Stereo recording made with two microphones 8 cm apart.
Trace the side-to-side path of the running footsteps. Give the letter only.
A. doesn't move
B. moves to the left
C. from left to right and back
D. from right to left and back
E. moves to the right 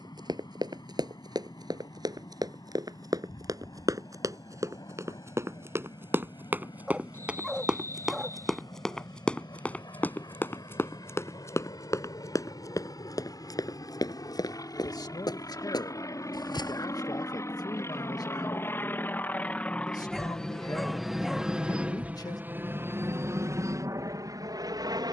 B.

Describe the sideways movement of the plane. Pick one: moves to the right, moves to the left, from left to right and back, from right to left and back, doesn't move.
moves to the right.